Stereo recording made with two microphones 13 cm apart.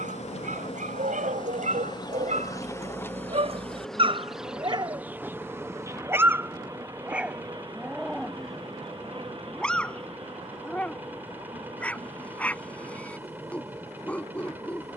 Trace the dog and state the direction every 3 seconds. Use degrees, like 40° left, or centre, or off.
70° right, 40° right, 10° right, 10° left, 10° left.